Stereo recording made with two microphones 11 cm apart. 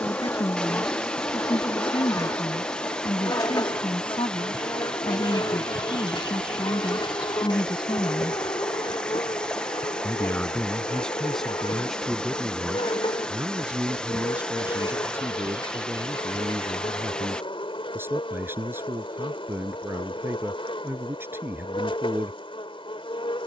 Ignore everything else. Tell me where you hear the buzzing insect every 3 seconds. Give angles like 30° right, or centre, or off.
30° left, 40° left, 50° left, 50° left, 50° left, 50° left, 50° left, 50° left.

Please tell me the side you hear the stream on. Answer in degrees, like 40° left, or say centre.
10° left.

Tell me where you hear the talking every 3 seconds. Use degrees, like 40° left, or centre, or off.
50° left, 50° left, 50° left, 10° left, 10° right, 20° right, 20° right, 20° right.